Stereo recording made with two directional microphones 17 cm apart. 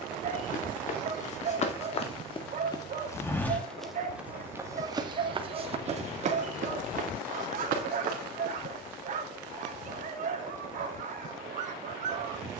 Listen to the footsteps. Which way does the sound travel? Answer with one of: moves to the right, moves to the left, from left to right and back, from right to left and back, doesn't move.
moves to the right.